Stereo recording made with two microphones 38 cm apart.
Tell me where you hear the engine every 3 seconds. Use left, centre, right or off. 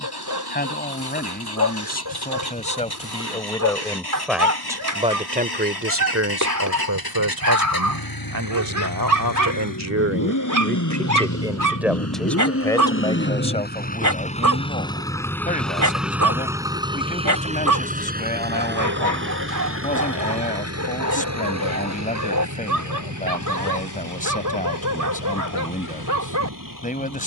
left, left, left, left, left, centre, right, right, right.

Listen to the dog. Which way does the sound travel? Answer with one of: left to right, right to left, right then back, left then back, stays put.
stays put.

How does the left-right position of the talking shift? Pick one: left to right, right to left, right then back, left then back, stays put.
right then back.